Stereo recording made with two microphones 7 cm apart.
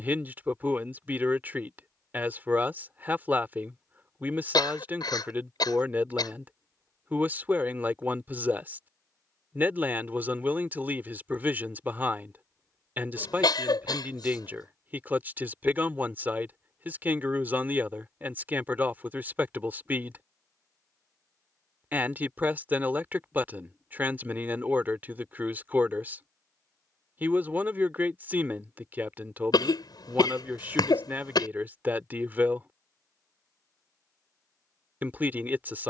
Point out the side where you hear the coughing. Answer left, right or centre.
left.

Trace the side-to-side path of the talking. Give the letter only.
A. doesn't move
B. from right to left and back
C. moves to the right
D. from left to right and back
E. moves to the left
A.